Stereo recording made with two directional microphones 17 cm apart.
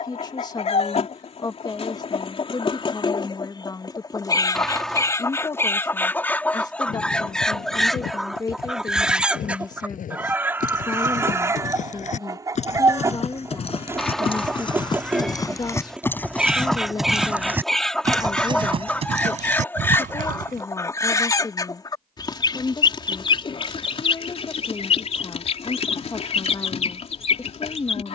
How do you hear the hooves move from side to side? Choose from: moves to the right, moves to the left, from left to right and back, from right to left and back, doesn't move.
moves to the right.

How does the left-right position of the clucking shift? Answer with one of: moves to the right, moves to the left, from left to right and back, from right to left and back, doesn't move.
from left to right and back.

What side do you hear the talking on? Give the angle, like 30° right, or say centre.
20° left.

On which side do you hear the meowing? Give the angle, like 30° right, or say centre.
centre.